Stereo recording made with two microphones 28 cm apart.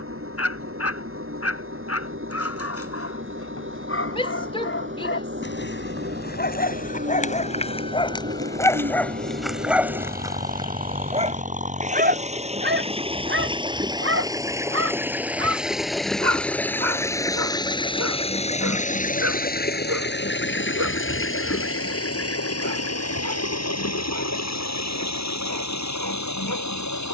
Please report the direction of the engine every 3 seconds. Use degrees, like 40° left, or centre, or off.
50° right, 40° right, 40° right, 30° right, 20° right, centre, 30° left, 60° left, 70° left.